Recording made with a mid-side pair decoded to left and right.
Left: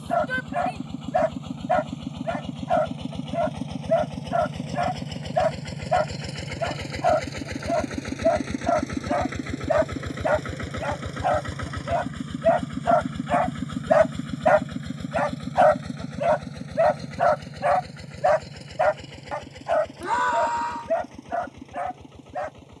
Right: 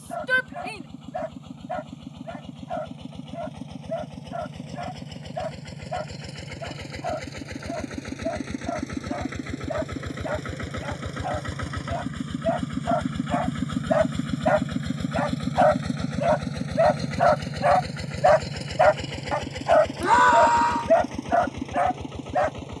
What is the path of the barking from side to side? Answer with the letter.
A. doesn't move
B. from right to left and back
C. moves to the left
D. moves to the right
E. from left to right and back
D.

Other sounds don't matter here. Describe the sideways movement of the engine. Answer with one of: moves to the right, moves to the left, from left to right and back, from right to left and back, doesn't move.
moves to the right.